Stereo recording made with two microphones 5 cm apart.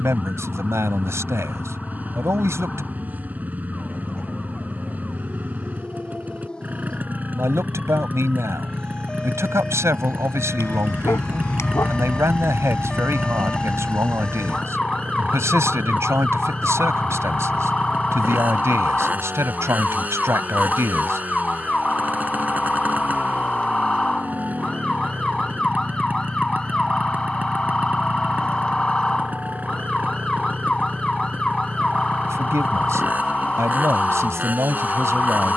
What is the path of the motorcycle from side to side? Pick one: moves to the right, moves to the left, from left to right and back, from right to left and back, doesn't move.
doesn't move.